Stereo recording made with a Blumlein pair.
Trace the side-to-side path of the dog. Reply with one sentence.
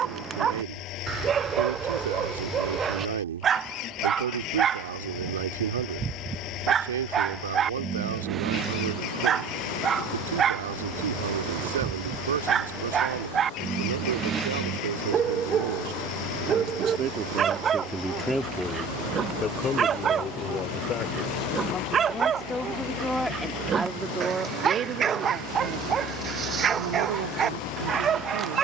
You can hear the dog stay in one place.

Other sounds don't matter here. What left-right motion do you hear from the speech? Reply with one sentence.
You can hear the speech move from right to left and back again.